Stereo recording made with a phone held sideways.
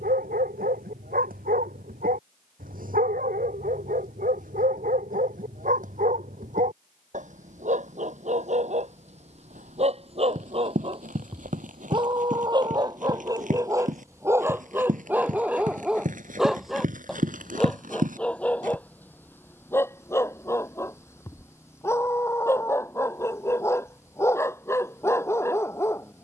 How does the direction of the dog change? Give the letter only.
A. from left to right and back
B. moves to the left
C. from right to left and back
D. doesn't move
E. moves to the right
B.